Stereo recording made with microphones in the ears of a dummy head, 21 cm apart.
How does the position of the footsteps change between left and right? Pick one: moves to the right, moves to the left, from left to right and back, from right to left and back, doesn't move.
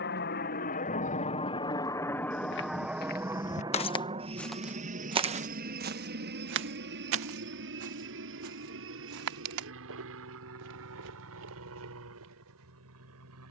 moves to the right.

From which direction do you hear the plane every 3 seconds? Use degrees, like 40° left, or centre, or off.
20° left, 20° right, 50° right, 50° right, 60° right.